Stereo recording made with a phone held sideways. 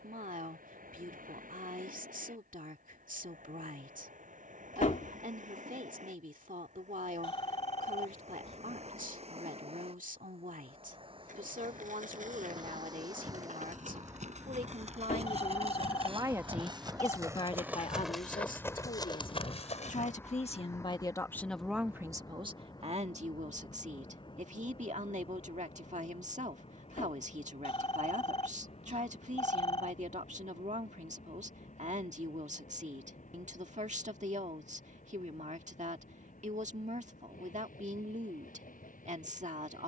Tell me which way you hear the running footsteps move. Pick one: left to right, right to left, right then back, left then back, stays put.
right to left.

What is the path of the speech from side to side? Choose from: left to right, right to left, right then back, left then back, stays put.
left then back.